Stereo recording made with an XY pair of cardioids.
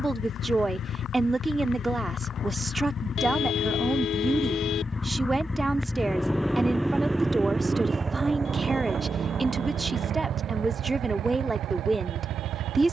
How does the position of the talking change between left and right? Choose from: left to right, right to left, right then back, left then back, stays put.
stays put.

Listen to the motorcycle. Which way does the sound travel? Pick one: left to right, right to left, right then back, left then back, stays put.
left to right.